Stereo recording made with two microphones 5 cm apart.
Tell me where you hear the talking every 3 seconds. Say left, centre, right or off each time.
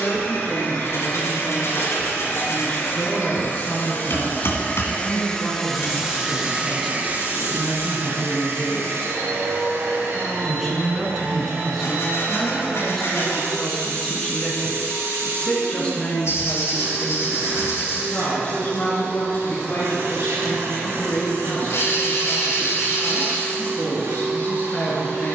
left, left, centre, centre, centre, left, left, left, left.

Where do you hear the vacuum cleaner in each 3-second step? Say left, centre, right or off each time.
left, left, right, right, right, right, right, right, right.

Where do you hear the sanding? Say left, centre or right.
left.